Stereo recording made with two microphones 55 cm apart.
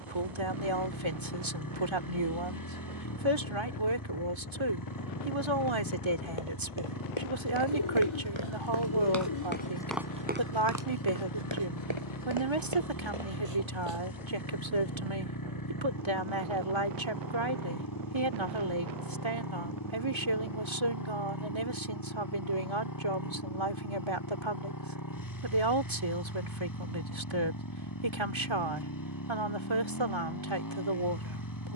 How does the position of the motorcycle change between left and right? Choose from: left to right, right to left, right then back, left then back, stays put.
stays put.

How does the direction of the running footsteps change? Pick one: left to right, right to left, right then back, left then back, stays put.
left to right.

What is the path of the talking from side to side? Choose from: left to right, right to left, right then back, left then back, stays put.
stays put.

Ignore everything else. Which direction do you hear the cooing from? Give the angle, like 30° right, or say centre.
60° left.